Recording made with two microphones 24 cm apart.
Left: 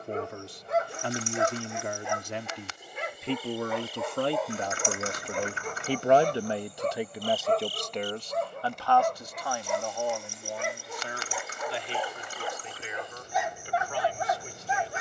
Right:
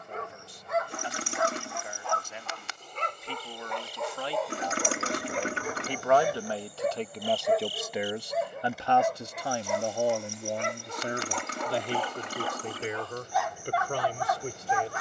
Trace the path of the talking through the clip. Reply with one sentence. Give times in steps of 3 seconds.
In this clip you hear the talking on the left from 0 s, in the centre from 6 s and on the right from 9 s.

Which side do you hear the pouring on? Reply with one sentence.
In this clip you hear the pouring on the right.